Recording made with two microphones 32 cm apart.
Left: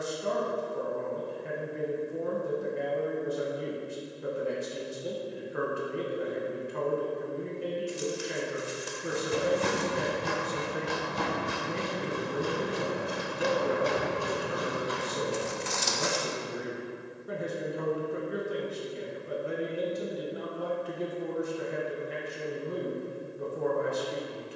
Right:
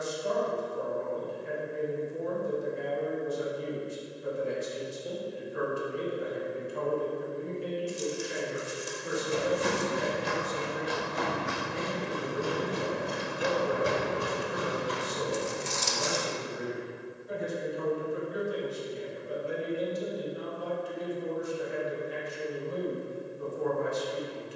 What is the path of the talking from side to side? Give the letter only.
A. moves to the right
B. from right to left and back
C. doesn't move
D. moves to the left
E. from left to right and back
C.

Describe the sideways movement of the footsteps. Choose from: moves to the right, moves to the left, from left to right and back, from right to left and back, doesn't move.
moves to the right.